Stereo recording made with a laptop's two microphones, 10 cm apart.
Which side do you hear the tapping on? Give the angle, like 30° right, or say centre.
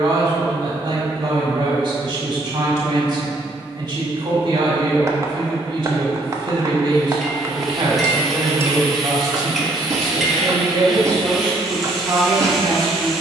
30° right.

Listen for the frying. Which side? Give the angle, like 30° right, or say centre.
centre.